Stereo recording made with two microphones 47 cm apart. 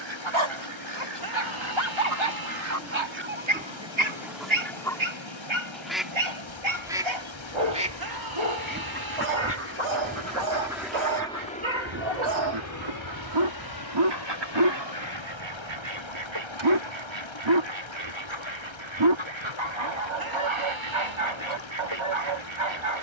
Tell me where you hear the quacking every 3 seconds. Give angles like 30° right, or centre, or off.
50° right, 10° right, 10° right, 30° right, 60° right, 70° right, 70° right, 70° right.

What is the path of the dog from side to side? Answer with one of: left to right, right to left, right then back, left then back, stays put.
stays put.